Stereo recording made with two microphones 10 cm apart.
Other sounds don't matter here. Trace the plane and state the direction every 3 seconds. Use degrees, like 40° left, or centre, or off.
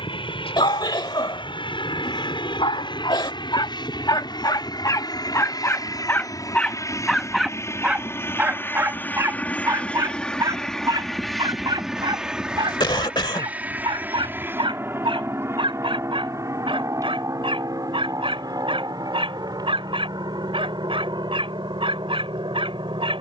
60° left, 50° left, 30° left, 10° left, 10° right, 30° right, 40° right, 50° right.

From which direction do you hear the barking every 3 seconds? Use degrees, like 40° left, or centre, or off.
60° left, 40° left, centre, 40° right, 60° right, 60° right, 70° right, 70° right.